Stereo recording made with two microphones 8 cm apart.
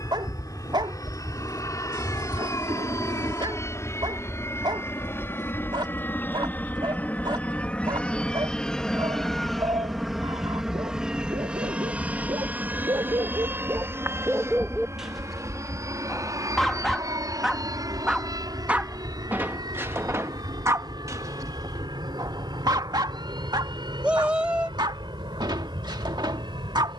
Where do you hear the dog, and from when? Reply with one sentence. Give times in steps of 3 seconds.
You can hear the dog on the right from 0 s, in the centre from 15 s and on the right from 18 s.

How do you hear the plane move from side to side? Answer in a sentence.
In this clip you hear the plane move from left to right.